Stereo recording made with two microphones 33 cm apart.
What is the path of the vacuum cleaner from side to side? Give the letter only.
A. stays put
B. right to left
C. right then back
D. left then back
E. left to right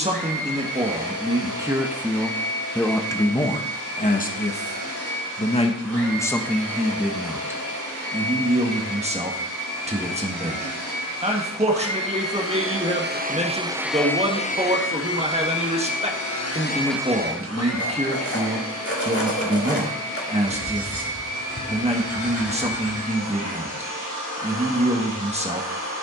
D.